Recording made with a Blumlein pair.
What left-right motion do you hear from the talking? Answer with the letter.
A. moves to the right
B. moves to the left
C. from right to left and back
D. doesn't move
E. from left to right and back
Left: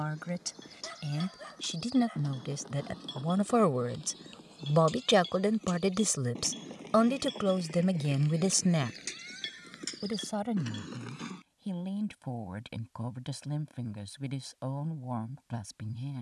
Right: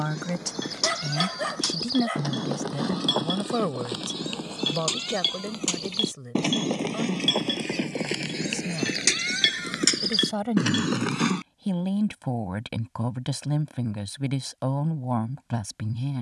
C.